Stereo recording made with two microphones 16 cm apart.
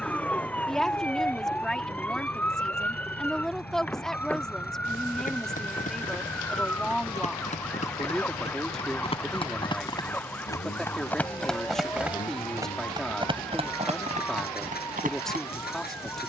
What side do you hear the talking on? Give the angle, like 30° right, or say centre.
centre.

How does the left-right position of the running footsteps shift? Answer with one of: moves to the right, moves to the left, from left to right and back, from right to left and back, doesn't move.
moves to the right.